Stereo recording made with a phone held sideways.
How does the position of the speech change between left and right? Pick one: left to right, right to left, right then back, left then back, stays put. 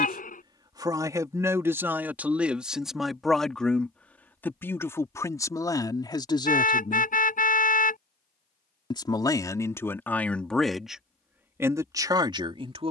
left then back.